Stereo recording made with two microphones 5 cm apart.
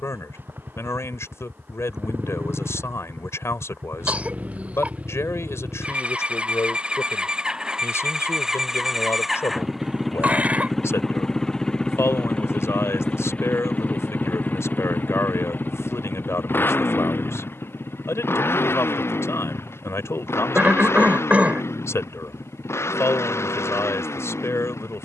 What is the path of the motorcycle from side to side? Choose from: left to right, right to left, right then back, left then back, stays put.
right to left.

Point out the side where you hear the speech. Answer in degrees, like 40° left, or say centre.
70° left.